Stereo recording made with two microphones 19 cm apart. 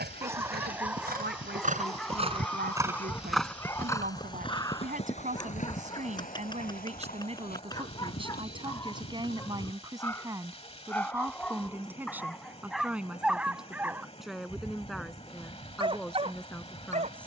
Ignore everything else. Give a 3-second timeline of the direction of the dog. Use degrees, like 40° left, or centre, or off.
centre, 20° left, 20° left, 10° left, 10° right, 30° right.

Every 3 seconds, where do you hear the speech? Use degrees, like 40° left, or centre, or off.
70° right, 50° right, 40° right, 20° right, centre, centre.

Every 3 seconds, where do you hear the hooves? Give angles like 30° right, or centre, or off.
50° right, 30° left, 60° left, 60° left, off, off.